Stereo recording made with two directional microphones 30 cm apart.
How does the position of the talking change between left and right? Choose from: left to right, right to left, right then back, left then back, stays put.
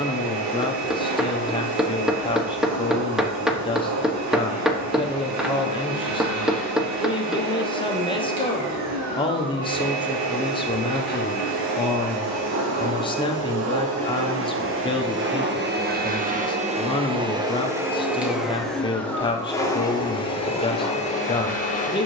stays put.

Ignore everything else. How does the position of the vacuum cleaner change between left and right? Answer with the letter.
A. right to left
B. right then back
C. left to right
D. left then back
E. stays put
A.